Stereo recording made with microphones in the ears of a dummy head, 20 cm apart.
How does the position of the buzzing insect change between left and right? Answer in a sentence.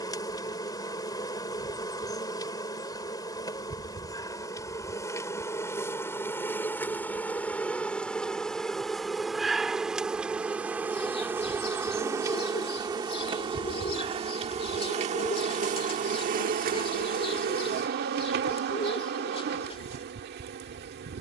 You can hear the buzzing insect move to the right.